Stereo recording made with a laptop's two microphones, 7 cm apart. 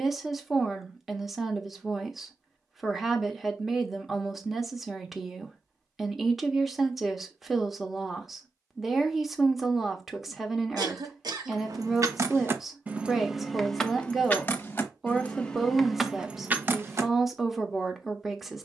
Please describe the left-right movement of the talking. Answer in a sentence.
In this clip you hear the talking stay in one place.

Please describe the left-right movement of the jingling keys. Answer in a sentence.
You can hear the jingling keys go left and come back.